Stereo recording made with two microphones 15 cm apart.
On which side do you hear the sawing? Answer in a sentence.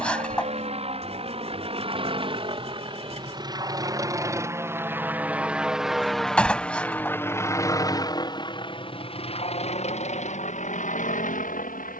You can hear the sawing on the right.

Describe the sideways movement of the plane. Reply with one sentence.
You can hear the plane travel towards the left.